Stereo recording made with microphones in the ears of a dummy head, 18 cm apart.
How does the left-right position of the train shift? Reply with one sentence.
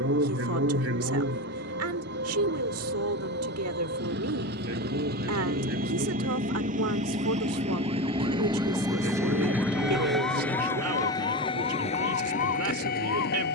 You can hear the train travel towards the left.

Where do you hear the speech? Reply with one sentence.
In this clip you hear the speech on the right.